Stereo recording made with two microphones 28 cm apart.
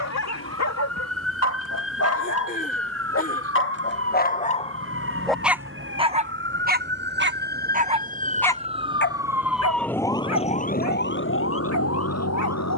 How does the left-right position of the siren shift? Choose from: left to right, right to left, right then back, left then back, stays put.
right to left.